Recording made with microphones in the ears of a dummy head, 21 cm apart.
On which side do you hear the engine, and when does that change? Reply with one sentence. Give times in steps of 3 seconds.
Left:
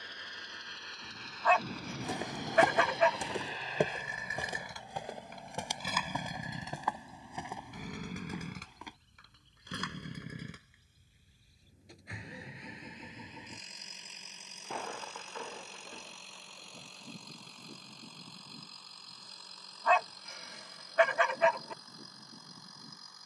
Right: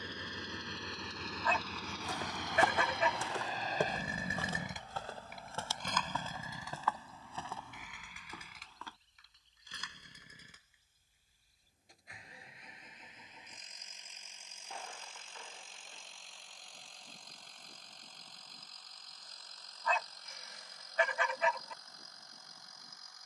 In this clip you hear the engine on the right from 0 s and on the left from 6 s.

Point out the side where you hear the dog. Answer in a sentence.
In this clip you hear the dog on the left.